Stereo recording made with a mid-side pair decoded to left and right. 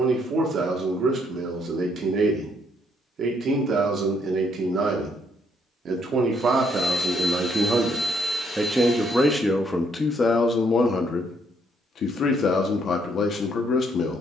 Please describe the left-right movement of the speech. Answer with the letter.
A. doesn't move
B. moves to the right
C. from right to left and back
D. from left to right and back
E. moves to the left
E.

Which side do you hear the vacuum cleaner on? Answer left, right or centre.
centre.